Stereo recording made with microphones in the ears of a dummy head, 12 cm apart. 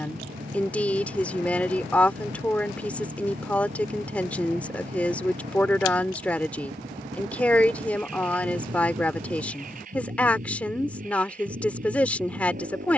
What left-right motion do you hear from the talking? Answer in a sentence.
You can hear the talking stay in one place.